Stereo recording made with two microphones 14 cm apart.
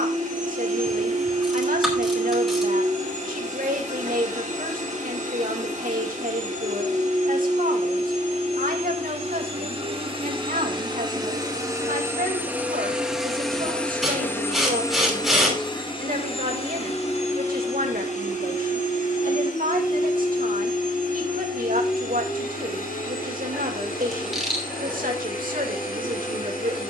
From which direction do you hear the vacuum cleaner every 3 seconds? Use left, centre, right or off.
right, right, right, right, centre, left, left, left, left.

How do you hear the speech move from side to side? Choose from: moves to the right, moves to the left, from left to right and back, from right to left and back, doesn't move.
doesn't move.